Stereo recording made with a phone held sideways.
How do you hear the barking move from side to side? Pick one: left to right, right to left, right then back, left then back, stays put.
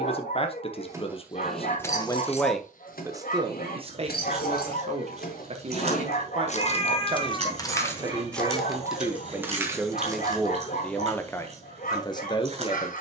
stays put.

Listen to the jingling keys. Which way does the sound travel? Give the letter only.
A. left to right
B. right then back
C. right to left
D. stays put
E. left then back
E.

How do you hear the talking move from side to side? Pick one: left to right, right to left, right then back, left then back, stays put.
right then back.